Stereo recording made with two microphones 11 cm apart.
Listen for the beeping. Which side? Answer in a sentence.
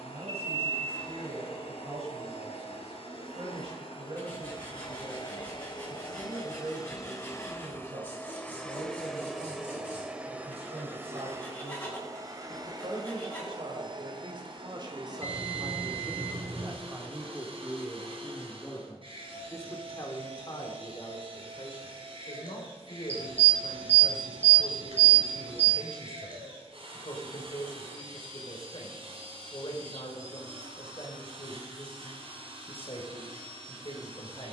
In this clip you hear the beeping on the right.